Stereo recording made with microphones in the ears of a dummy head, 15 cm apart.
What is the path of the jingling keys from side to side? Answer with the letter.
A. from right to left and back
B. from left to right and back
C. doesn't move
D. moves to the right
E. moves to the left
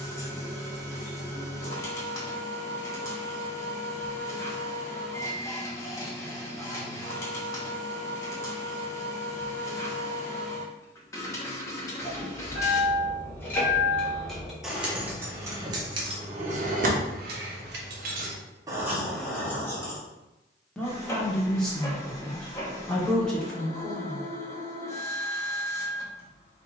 B.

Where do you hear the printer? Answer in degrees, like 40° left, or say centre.
20° left.